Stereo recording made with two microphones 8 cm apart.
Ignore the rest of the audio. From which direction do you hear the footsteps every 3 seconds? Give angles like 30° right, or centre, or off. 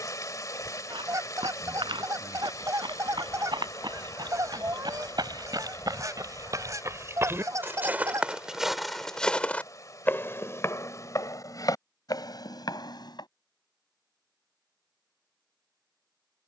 70° right, 60° right, 30° right, 30° left, 60° left, off.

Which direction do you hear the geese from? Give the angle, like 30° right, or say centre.
40° right.